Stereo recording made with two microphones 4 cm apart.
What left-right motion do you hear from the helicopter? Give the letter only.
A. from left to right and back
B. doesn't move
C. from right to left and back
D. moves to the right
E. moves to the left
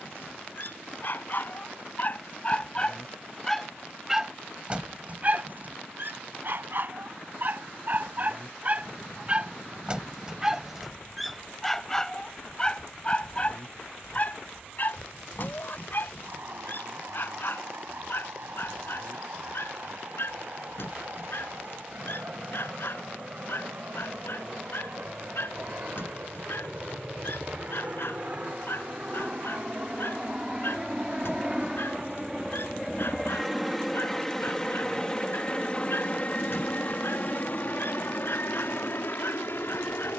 E.